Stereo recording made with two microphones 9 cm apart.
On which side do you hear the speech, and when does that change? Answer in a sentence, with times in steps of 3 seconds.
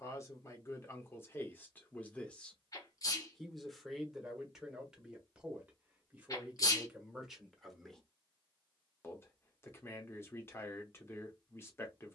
You can hear the speech on the left from 0 s, in the centre from 3 s and on the left from 9 s.